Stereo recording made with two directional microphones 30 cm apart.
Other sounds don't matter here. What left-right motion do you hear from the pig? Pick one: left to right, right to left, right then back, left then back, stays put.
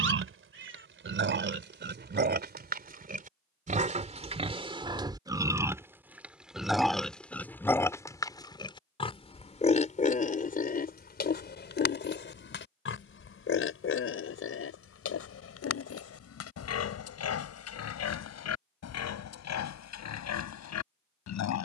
right to left.